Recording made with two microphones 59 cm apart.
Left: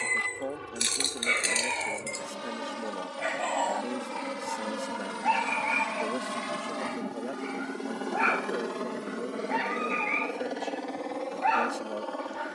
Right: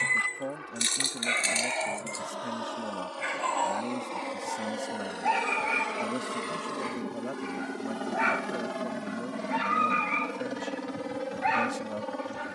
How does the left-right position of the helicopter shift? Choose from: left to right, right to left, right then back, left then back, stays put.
left to right.